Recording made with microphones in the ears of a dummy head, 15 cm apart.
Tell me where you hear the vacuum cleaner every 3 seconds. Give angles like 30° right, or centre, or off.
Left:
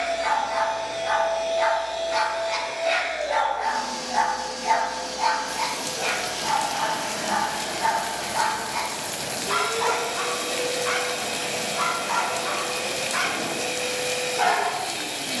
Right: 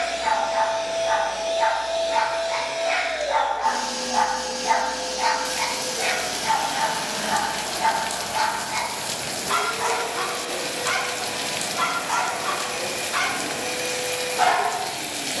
30° right, 30° right, centre, 40° left, 40° left.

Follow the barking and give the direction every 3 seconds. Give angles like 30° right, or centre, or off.
50° left, 10° left, 30° right, 40° right, 50° right.